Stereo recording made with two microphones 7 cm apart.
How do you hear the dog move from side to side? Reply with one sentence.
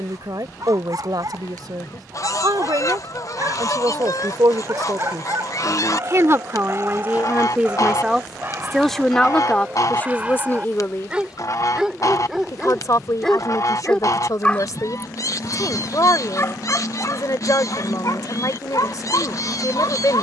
In this clip you hear the dog move to the left.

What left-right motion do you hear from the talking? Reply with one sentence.
You can hear the talking travel towards the left.